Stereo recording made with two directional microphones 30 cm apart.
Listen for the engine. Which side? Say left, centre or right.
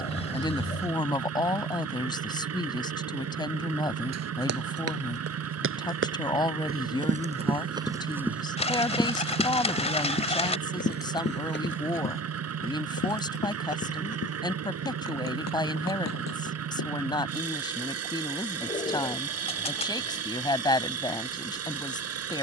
right.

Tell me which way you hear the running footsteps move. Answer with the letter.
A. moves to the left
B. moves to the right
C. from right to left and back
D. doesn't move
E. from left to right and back
A.